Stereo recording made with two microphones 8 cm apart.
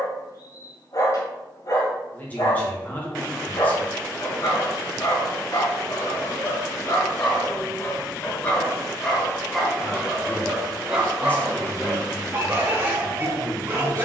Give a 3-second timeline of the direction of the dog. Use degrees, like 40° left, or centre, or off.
50° left, 50° left, 30° left, 10° right, 30° right.